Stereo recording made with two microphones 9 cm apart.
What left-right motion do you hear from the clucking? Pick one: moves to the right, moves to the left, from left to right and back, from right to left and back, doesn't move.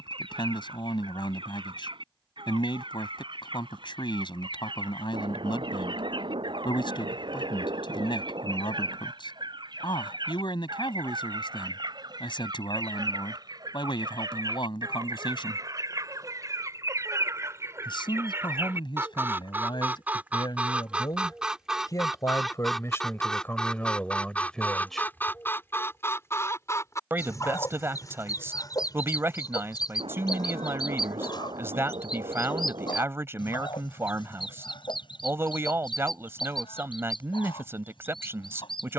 moves to the left.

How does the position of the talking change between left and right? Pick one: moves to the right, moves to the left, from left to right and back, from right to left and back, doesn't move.
moves to the right.